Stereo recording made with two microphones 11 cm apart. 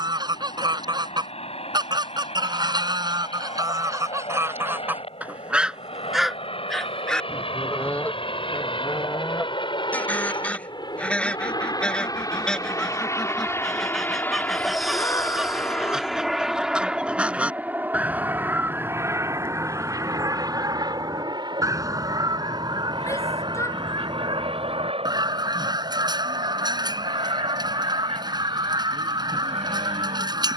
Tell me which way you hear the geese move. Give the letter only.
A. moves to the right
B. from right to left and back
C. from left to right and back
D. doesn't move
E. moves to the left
B.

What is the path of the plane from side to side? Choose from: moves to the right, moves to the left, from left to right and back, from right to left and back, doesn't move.
moves to the right.